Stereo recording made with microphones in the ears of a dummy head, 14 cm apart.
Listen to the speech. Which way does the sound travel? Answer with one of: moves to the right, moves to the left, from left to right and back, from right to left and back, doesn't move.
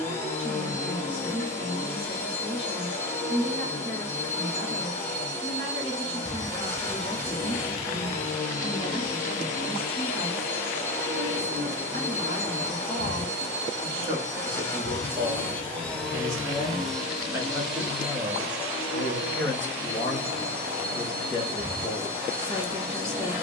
moves to the left.